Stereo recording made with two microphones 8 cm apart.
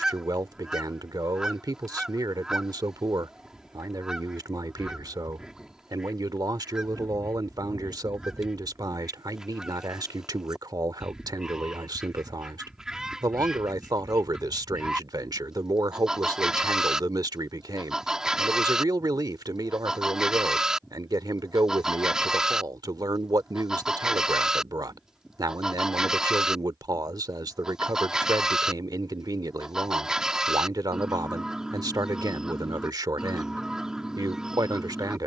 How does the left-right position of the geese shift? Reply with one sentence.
You can hear the geese stay put.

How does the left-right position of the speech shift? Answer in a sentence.
You can hear the speech stay in one place.